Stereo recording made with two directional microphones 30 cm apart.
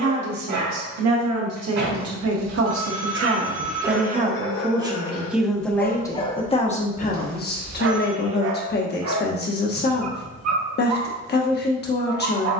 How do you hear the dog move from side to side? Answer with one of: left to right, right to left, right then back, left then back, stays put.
left then back.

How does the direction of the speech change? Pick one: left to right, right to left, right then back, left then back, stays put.
right to left.